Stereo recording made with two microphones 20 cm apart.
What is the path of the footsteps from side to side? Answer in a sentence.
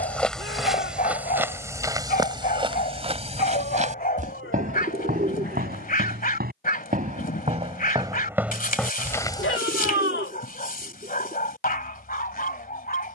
You can hear the footsteps go right and come back.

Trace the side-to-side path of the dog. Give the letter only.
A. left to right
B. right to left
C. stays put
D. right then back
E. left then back
C.